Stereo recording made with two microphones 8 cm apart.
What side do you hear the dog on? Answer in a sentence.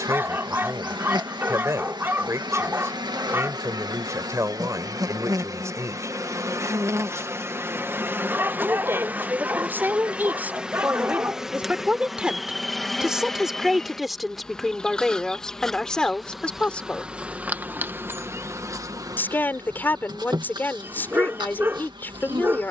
You can hear the dog on the right.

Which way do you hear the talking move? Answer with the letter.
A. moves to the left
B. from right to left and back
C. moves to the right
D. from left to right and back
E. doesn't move
A.